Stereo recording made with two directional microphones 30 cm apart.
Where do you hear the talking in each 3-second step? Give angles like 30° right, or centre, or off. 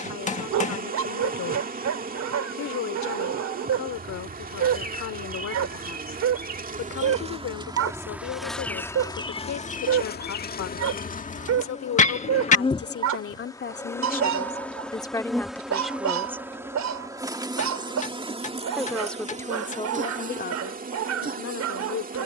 60° left, 60° left, 60° left, 60° left, 40° left, centre, 20° left, 60° left.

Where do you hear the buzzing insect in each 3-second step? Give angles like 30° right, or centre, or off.
30° right, 30° right, 10° right, 30° left, 10° left, 10° right, 20° right, 30° right.